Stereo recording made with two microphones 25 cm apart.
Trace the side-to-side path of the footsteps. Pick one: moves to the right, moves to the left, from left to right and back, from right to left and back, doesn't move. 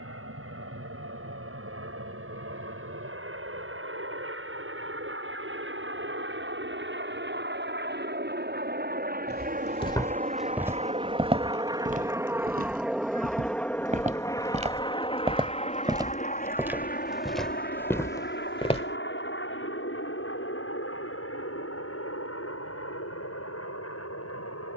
from left to right and back.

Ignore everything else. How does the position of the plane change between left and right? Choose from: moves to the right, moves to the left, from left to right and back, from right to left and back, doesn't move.
moves to the left.